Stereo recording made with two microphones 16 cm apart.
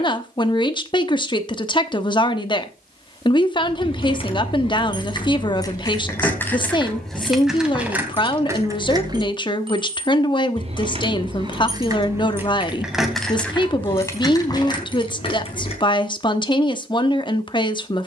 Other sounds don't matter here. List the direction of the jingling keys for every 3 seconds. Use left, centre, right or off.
off, left, centre, right, centre, left.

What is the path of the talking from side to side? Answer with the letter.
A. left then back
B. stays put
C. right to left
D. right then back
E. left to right
B.